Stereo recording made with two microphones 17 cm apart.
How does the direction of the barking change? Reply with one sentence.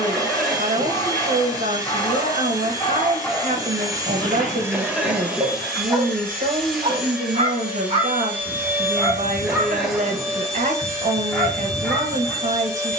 In this clip you hear the barking move from left to right and back again.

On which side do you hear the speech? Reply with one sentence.
You can hear the speech on the right.